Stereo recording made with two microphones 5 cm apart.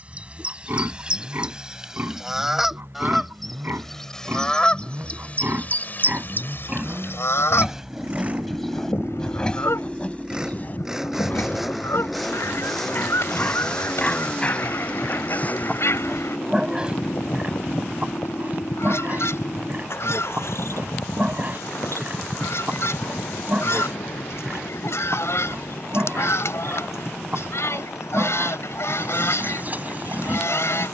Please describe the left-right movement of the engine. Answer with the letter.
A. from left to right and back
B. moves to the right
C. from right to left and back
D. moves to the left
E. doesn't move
D.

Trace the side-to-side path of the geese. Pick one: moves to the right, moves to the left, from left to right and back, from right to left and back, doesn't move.
moves to the left.